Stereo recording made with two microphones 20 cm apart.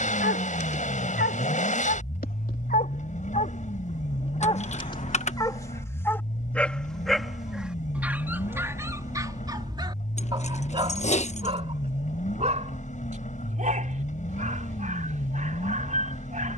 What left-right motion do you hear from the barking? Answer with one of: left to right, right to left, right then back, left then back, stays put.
left to right.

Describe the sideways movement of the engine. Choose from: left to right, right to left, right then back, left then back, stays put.
stays put.